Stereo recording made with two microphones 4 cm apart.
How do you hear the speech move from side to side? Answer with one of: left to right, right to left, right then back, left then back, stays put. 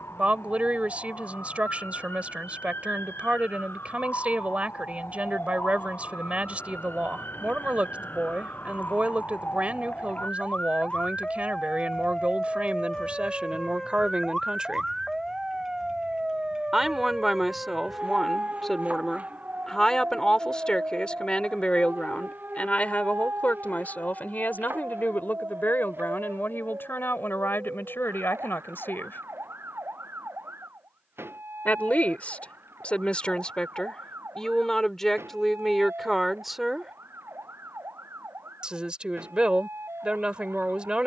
left then back.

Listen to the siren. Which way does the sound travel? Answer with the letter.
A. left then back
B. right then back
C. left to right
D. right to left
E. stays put
C.